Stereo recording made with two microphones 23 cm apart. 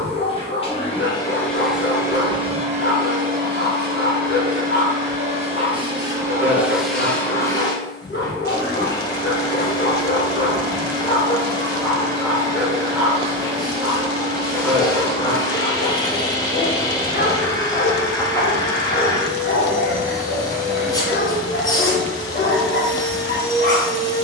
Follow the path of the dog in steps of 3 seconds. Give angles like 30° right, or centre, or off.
50° left, 50° left, 50° left, 30° left, centre, 40° left, 40° left, 40° left.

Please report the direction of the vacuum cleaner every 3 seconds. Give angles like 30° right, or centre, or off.
centre, 30° right, 10° left, 20° left, 20° left, 20° left, 20° left, 20° left.